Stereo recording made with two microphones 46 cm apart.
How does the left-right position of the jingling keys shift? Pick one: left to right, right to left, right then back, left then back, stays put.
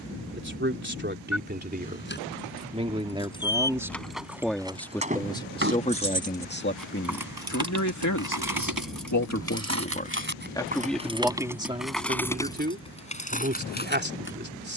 right then back.